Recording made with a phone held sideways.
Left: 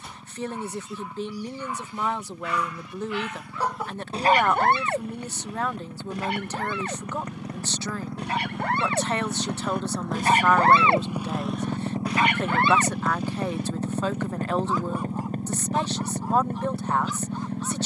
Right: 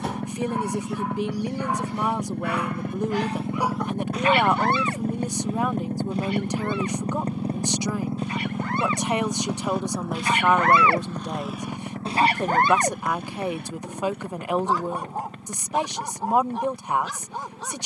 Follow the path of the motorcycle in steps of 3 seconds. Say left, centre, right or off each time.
right, right, right, centre, left, left.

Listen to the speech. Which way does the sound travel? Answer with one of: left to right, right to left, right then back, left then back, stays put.
stays put.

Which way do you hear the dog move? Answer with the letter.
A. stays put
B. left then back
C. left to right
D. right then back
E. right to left
B.